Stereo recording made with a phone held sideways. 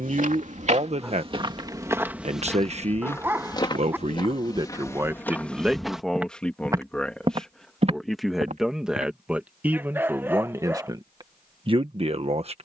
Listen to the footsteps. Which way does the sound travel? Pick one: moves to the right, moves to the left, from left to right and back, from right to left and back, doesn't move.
from right to left and back.